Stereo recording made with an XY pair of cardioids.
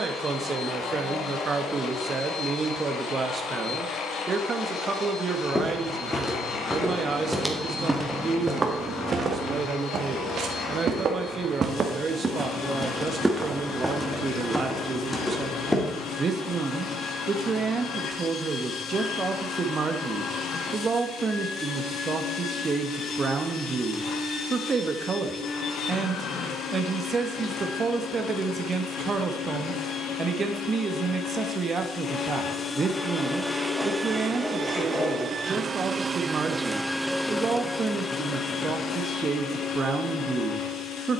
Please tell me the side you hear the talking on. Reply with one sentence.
You can hear the talking on the right.